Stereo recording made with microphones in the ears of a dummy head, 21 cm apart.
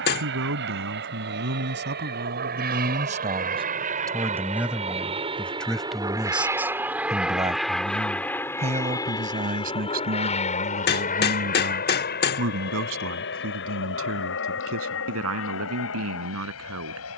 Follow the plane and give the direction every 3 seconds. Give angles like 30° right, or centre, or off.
50° right, 30° right, centre, 30° left, 50° left, 60° left.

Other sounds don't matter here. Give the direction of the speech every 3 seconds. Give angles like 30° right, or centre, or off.
50° right, 10° right, 20° right, 40° right, 60° right, 70° right.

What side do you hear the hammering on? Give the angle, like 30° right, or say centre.
40° left.